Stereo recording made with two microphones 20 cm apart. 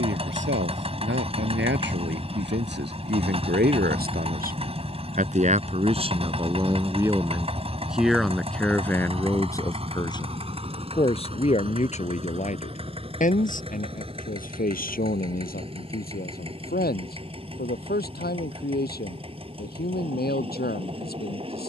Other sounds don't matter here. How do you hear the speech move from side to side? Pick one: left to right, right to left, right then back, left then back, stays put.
right to left.